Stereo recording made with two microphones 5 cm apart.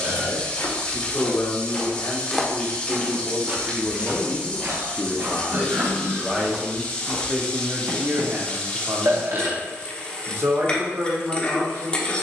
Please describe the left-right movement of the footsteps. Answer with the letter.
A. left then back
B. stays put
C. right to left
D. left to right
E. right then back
D.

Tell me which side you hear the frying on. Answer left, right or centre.
left.